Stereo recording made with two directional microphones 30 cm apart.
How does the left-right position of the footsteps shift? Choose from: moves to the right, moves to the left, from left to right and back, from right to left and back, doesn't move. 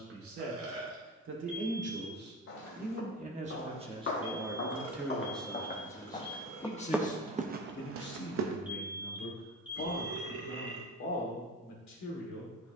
moves to the right.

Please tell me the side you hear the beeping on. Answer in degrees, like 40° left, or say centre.
centre.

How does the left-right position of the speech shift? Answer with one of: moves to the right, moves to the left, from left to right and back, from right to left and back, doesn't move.
moves to the left.